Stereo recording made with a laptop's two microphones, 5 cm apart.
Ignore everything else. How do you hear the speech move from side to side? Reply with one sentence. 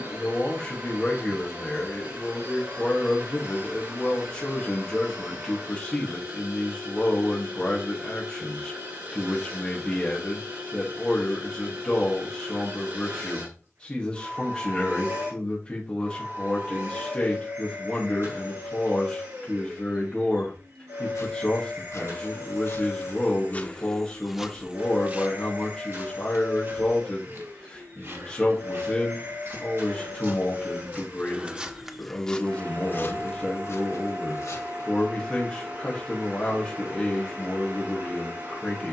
You can hear the speech stay put.